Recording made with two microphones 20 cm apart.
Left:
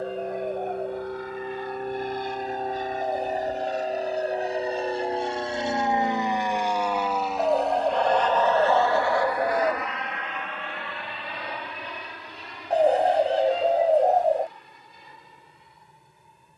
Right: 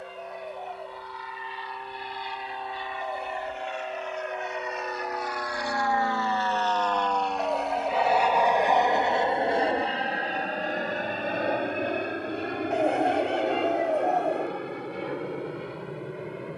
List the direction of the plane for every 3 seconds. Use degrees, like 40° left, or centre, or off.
50° left, 30° left, centre, 30° right, 60° right, 70° right.